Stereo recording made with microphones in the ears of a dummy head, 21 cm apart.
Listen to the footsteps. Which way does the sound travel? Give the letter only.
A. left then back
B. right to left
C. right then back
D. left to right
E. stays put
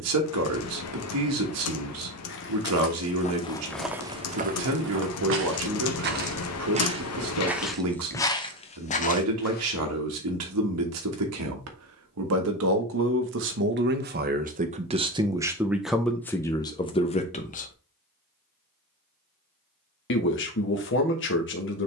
C.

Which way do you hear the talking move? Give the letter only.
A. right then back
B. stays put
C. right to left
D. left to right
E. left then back
C.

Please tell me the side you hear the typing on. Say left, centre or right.
left.